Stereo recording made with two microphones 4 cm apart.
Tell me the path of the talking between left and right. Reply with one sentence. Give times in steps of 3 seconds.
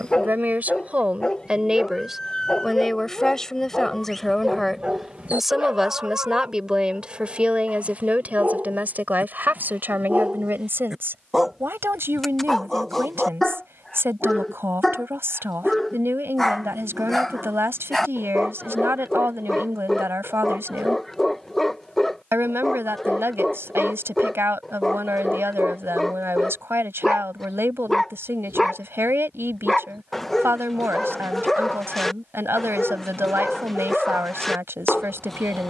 You can hear the talking on the right from 0 s, in the centre from 3 s and on the right from 6 s.